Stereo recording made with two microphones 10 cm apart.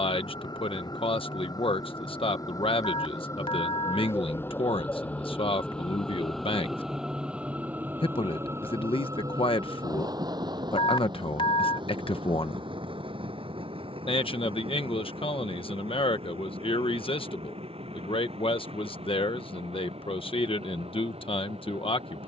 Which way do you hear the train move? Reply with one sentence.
You can hear the train travel towards the right.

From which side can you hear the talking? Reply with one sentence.
You can hear the talking on the left.